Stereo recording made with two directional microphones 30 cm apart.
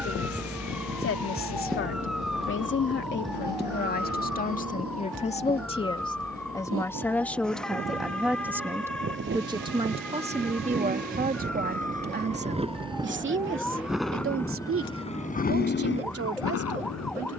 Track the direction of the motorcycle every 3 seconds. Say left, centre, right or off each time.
right, right, right, right, centre, left.